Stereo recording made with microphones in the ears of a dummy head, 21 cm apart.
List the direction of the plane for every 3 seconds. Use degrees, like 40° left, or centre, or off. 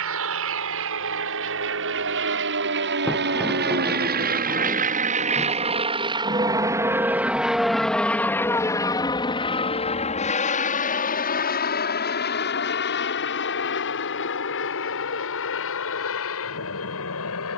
60° right, 40° right, centre, 30° left, 50° left, 60° left.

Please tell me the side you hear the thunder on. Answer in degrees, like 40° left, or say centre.
centre.